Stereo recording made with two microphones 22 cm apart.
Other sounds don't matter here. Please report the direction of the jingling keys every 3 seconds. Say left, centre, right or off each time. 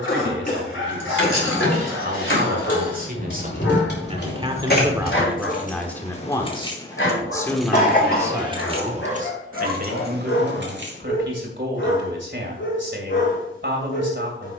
left, left, centre, right, off.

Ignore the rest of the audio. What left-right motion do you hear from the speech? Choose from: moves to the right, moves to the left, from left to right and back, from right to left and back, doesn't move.
from right to left and back.